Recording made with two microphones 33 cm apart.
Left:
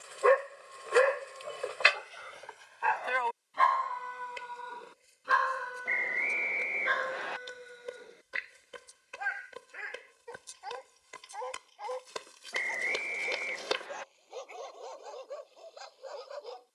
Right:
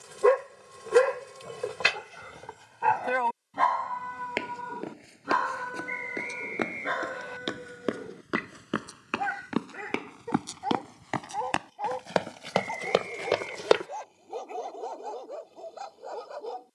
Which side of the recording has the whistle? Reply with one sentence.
In this clip you hear the whistle on the left.